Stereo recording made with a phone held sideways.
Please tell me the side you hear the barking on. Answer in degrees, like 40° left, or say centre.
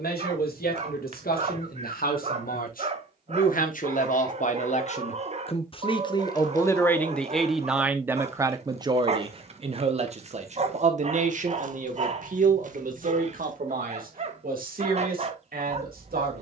40° right.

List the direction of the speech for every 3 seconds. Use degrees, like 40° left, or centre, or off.
70° left, 50° left, centre, 50° right, 60° right, 70° right.